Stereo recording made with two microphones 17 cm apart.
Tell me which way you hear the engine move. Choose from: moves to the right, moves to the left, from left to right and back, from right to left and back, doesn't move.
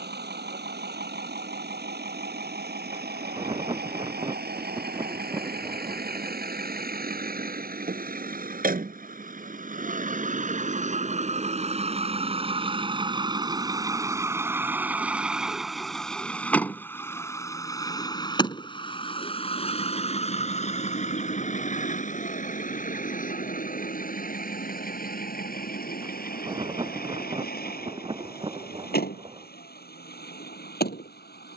moves to the left.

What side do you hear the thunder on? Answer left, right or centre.
right.